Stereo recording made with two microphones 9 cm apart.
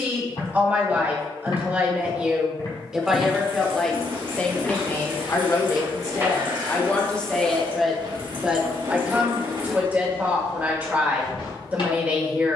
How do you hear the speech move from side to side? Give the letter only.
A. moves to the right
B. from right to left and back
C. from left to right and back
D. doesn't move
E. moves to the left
B.